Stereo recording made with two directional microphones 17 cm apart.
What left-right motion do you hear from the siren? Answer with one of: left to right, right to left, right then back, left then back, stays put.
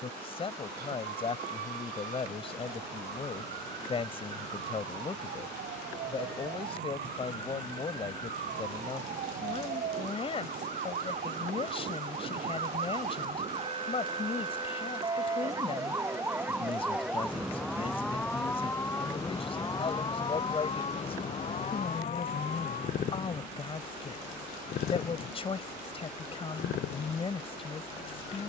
right to left.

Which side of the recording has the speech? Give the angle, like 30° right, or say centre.
30° left.